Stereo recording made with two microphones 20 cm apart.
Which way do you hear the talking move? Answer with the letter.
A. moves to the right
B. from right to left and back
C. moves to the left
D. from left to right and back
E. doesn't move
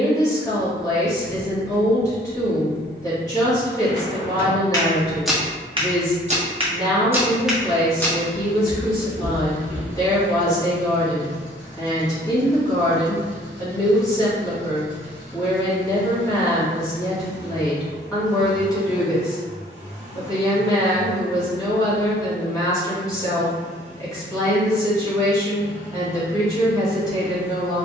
E.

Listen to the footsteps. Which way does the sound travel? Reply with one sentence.
You can hear the footsteps go right and come back.